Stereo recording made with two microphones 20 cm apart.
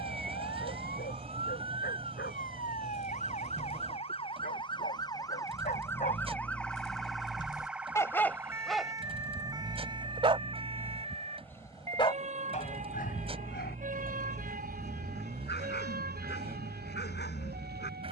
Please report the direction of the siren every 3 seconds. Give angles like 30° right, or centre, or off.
50° left, 30° left, centre, 20° right, 40° right, 50° right.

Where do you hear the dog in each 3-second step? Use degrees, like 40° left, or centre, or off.
60° left, 50° left, 20° left, 10° right, 50° left, 60° left.